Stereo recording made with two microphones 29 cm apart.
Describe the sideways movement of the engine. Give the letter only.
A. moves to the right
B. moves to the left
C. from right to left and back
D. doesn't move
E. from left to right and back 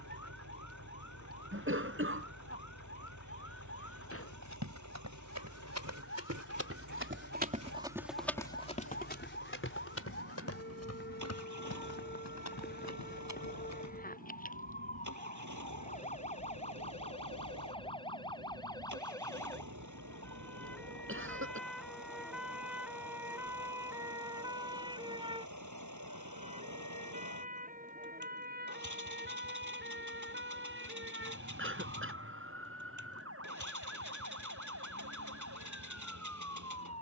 D.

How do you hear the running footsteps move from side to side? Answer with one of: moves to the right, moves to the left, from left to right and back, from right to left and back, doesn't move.
moves to the left.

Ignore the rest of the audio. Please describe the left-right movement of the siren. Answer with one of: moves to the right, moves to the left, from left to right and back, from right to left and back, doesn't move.
moves to the right.